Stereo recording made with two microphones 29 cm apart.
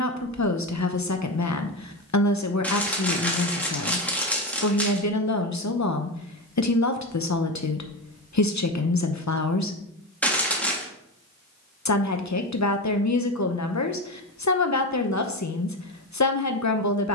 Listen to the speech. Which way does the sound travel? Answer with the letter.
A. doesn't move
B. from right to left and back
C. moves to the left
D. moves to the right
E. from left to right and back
A.